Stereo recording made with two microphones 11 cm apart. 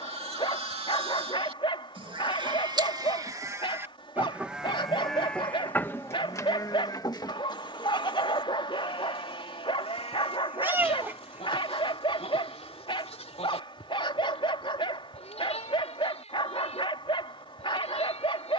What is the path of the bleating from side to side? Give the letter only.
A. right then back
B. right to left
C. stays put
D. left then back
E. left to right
B.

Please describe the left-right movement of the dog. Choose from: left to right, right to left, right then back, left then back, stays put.
stays put.